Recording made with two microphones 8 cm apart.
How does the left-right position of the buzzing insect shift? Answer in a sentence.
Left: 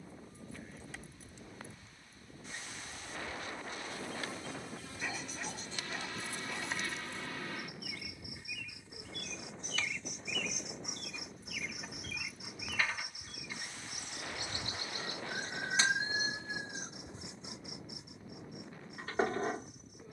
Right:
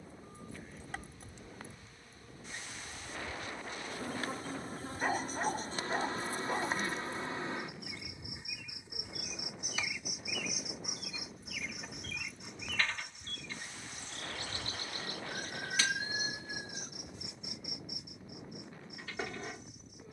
In this clip you hear the buzzing insect go from the right side to the left.